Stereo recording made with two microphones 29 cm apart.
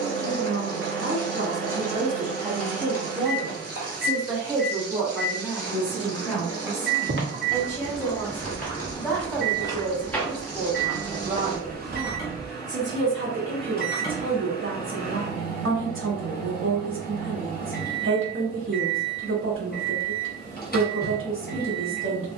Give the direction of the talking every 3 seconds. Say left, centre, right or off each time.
right, centre, centre, centre, right, right, right, right.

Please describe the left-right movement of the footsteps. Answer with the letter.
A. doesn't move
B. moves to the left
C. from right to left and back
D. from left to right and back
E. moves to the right
C.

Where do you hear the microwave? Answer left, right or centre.
left.